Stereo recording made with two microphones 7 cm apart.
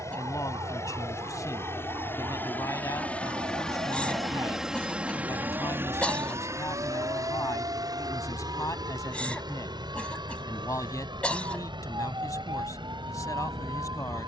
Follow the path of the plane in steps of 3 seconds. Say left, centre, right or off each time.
left, centre, right, right, right.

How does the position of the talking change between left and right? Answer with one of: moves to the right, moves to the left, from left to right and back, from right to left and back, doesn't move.
doesn't move.